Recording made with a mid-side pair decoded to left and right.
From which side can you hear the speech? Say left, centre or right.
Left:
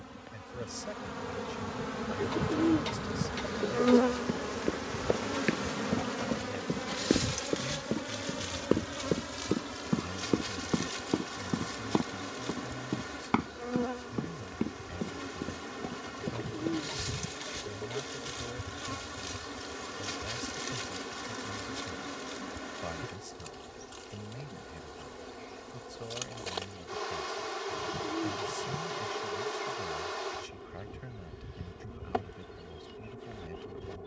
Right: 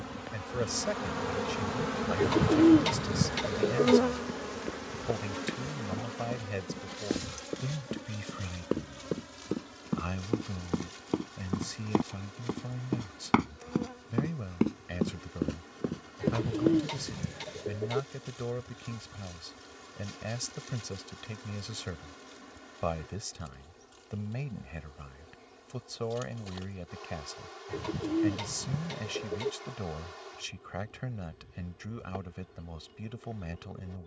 right.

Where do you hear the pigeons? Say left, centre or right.
right.